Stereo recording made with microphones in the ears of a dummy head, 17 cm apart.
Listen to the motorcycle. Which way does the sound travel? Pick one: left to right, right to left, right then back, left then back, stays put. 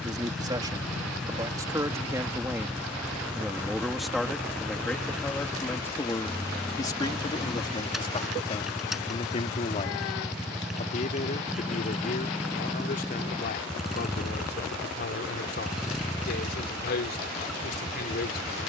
stays put.